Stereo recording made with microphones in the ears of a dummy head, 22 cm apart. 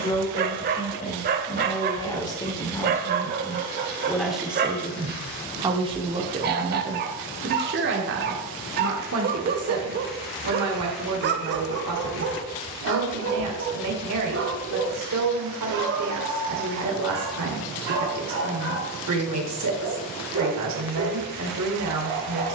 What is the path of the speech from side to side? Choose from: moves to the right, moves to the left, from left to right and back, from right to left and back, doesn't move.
moves to the right.